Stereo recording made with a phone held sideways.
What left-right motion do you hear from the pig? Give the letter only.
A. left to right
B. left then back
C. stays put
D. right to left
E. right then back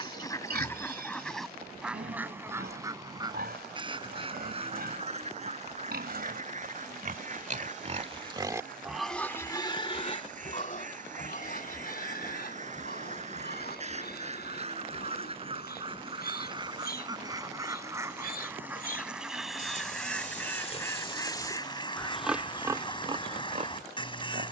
B.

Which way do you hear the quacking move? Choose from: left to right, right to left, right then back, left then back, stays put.
right then back.